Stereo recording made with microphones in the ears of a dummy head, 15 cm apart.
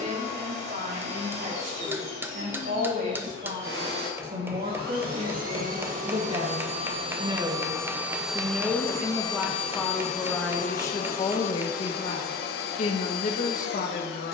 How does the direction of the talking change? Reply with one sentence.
In this clip you hear the talking move from right to left.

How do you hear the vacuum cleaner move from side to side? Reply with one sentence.
You can hear the vacuum cleaner go from the right side to the left.